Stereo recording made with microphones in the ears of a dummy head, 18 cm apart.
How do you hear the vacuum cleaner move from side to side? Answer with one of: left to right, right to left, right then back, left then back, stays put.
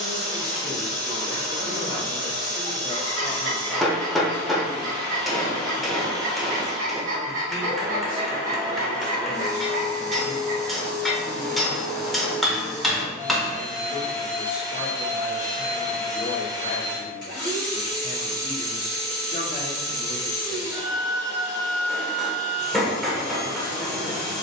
stays put.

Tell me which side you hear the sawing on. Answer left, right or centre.
right.